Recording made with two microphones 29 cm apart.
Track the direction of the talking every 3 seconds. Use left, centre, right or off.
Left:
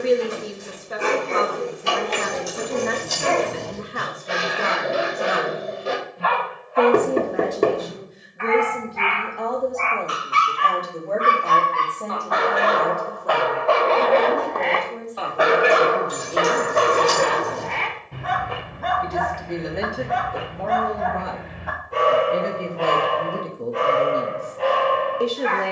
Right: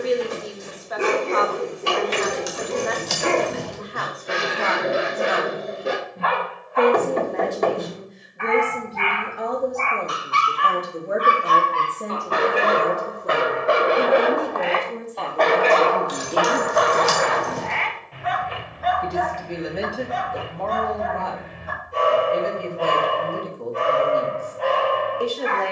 left, left, centre, centre, right, right, centre, left, left.